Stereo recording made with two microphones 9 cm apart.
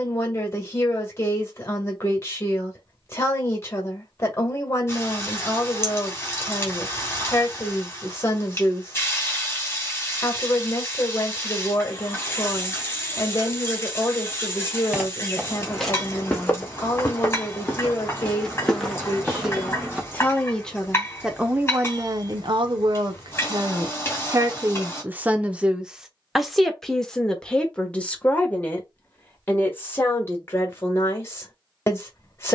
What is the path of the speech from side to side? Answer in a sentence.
In this clip you hear the speech move from left to right and back again.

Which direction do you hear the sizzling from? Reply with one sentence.
In this clip you hear the sizzling on the left.